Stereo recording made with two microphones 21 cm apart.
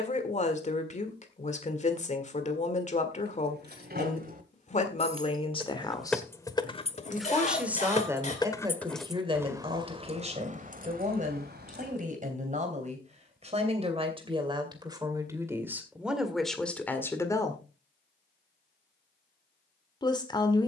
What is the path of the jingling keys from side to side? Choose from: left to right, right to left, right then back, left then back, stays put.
left then back.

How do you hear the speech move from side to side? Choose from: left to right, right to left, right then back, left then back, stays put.
right then back.